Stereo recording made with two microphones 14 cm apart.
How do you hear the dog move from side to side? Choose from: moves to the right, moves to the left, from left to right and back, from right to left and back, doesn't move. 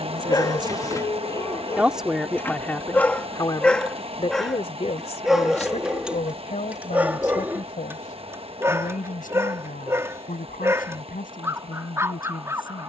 moves to the right.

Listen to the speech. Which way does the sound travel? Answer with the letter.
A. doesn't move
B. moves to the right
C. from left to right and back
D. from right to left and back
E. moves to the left
E.